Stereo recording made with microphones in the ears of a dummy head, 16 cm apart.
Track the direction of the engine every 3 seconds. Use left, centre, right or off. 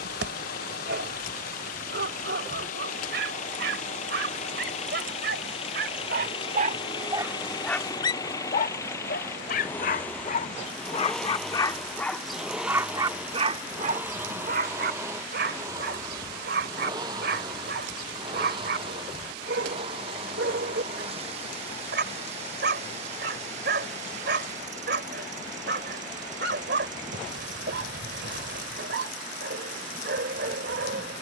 left, left, left, centre, centre, right, right, right, right, right, off.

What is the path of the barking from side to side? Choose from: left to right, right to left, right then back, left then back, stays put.
left then back.